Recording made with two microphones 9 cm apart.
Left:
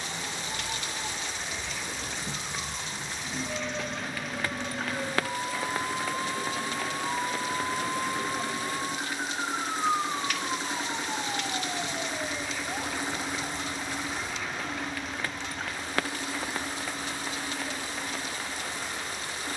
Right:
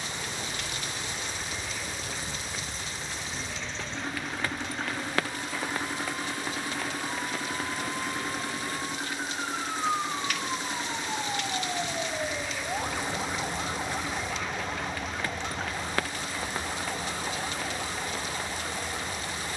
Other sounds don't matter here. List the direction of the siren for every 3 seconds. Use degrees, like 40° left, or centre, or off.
60° left, 50° left, 30° left, centre, 20° right, 40° right, 50° right.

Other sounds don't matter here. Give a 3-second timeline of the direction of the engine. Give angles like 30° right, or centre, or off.
40° right, 30° right, 10° right, 10° left, 30° left, 40° left, 50° left.